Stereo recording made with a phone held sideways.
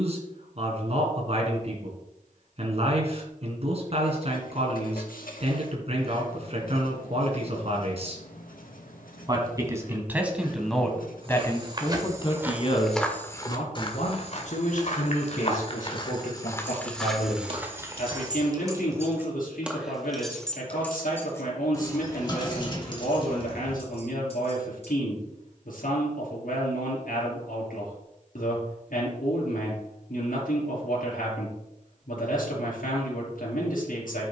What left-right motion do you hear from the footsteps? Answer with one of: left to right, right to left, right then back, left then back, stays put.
left then back.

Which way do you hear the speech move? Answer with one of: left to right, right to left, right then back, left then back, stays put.
right to left.